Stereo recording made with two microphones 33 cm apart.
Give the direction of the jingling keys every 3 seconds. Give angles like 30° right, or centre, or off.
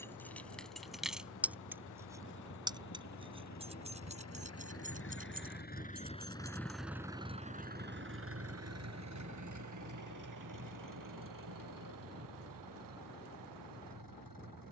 centre, 20° right, 30° right, off, off.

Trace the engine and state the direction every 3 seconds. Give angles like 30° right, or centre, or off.
60° left, 40° left, 20° right, 70° right, 80° right.